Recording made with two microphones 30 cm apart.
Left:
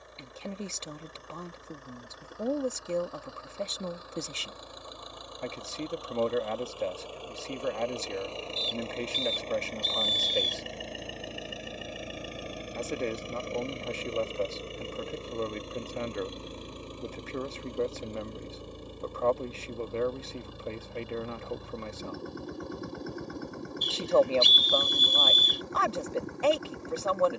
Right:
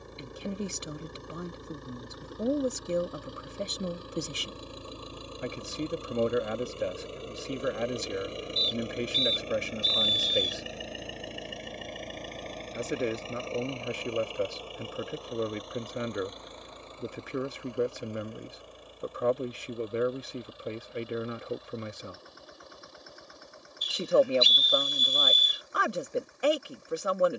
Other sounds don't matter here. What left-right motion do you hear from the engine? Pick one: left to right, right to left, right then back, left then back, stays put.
right to left.